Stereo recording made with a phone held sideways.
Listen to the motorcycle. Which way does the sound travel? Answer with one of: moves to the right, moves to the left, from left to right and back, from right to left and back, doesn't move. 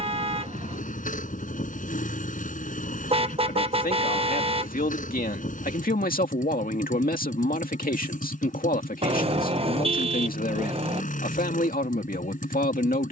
doesn't move.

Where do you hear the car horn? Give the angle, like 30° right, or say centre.
40° right.